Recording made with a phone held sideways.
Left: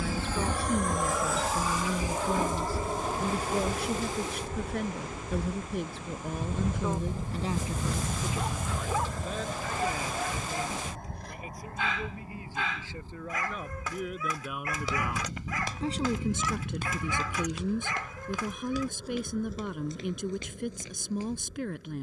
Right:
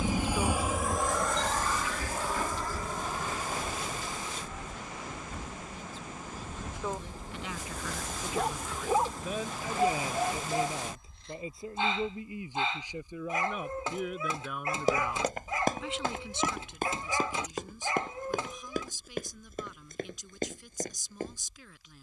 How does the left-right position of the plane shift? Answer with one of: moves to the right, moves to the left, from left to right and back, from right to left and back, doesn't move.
moves to the left.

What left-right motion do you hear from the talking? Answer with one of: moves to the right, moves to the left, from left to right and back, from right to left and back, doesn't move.
from left to right and back.